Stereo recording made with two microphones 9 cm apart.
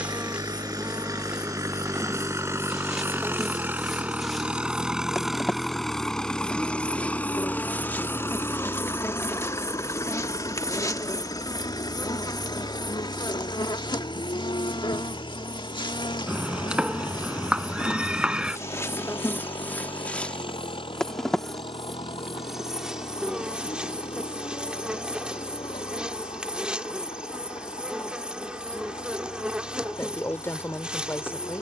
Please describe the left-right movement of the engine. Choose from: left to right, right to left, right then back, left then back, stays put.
right to left.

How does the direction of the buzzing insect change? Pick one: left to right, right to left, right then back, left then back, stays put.
left then back.